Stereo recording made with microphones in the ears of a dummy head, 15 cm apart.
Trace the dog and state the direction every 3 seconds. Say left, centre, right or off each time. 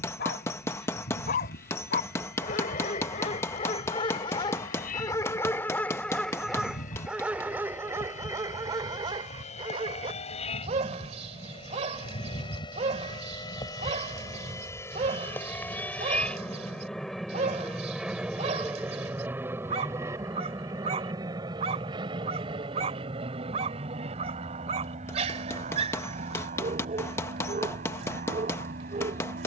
left, left, centre, right, right, right, right, right, right, right.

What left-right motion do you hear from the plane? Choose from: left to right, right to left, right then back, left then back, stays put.
left to right.